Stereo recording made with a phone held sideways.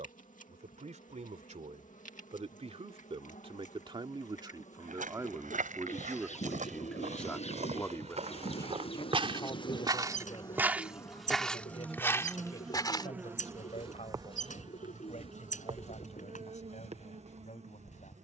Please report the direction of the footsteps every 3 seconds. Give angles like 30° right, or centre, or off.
off, 70° right, 60° right, 20° right, 40° left, 60° left.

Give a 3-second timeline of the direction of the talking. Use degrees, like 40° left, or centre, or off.
60° right, 30° right, 10° left, 40° left, 50° left, 60° left.